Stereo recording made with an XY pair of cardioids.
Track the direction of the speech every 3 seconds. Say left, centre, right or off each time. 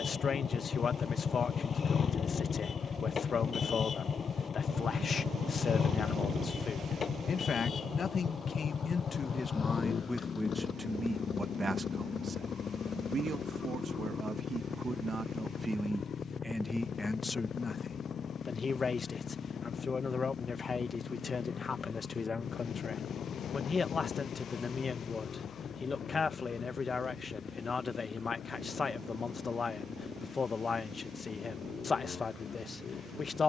left, left, left, centre, right, centre, left, left, left, left, left.